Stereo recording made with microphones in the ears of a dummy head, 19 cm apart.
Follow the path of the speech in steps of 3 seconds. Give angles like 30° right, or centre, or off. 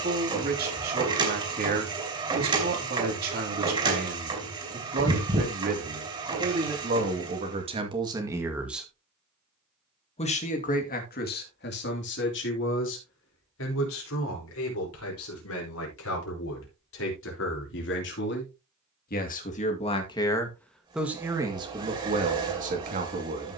50° right, 50° right, 30° right, 40° left, 70° left, 70° left, 30° left, 30° right.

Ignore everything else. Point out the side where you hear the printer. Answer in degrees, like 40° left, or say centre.
20° right.